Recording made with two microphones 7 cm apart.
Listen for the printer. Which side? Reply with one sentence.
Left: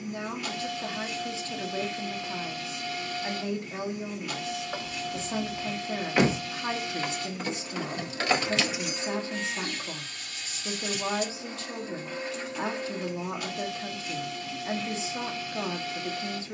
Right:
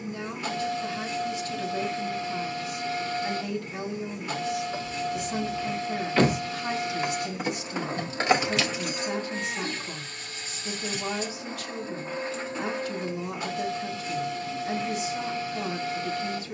You can hear the printer on the right.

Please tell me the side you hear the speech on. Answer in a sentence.
You can hear the speech on the left.